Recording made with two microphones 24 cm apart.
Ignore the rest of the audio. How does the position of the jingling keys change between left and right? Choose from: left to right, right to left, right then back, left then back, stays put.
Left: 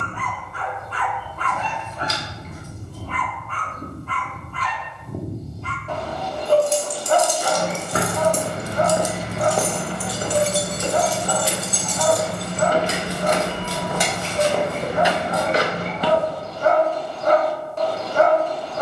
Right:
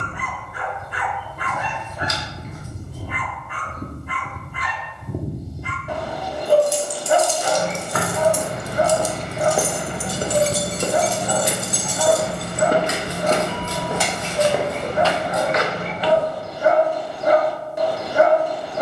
right then back.